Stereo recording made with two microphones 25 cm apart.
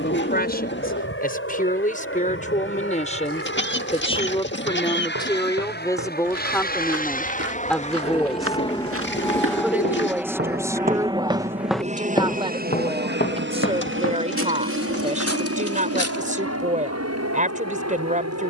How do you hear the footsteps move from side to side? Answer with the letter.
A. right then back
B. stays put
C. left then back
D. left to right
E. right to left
E.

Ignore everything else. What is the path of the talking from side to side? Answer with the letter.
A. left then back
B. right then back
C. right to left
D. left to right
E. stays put
D.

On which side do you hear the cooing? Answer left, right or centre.
left.